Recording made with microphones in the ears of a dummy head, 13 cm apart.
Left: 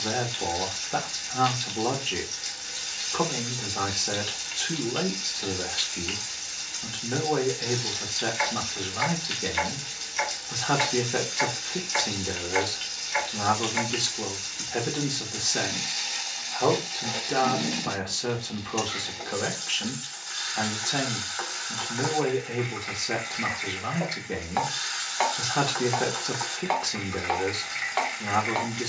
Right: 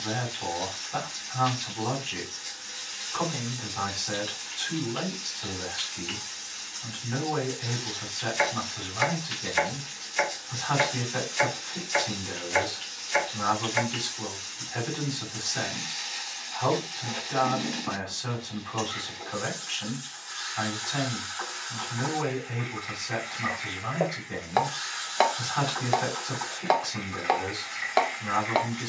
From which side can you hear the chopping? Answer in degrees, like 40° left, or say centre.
50° right.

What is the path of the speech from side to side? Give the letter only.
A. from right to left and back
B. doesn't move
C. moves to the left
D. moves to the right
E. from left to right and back
B.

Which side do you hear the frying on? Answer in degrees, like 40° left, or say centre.
70° left.